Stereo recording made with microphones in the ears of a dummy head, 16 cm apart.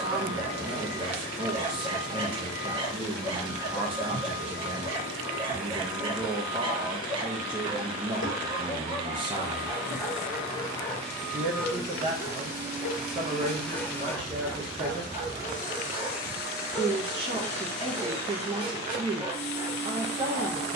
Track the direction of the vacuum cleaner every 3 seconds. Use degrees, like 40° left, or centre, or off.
60° left, 60° left, 60° left, 30° left, centre, 50° left, 60° left.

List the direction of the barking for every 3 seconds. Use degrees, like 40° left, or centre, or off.
30° right, 30° right, 30° right, 10° left, 10° left, 20° right, 20° right.